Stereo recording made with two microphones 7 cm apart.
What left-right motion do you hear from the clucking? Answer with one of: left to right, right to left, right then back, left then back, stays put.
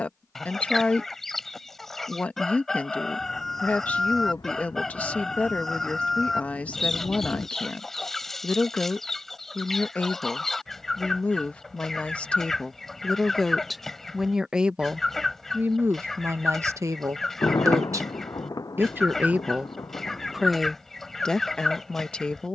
stays put.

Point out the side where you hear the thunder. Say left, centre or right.
left.